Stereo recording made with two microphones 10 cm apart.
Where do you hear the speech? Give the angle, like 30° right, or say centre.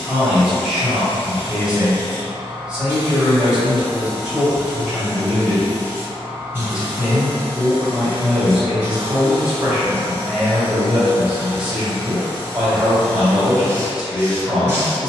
10° right.